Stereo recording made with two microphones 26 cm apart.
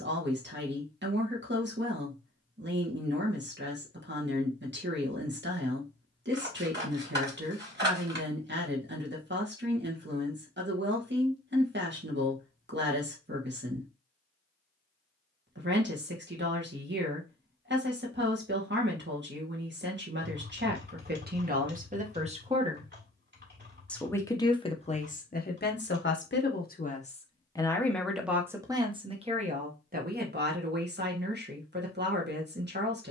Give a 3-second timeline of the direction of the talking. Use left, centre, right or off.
right, right, right, right, right, right, right, right, left, centre, right.